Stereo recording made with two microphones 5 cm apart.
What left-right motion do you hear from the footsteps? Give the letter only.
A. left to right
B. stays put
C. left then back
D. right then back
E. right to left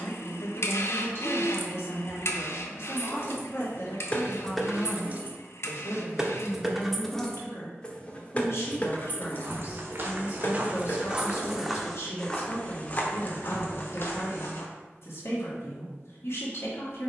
E.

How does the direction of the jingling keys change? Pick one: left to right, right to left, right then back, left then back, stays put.
right then back.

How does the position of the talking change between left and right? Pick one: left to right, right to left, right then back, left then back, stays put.
stays put.